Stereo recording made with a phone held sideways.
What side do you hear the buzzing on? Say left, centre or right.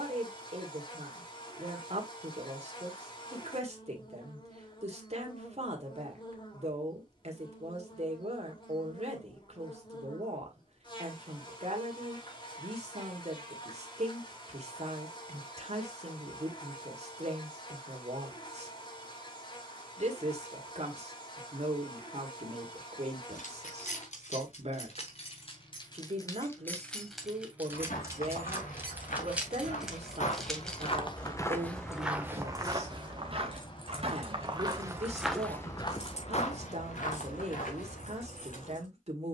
left.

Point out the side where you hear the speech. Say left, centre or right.
right.